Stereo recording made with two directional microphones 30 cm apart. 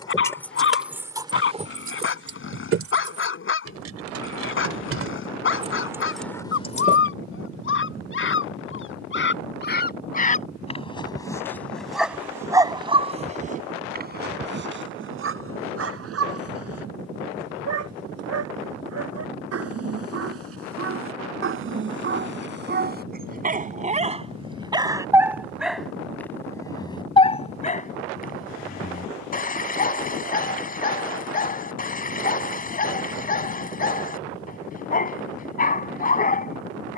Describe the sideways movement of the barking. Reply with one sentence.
You can hear the barking go right and come back.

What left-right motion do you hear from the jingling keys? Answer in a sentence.
You can hear the jingling keys go right and come back.